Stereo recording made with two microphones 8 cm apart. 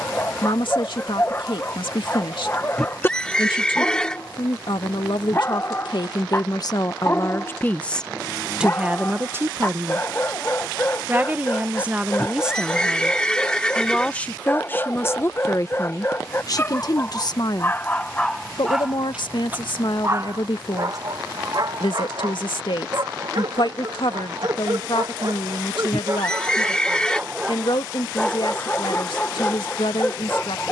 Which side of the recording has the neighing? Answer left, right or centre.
centre.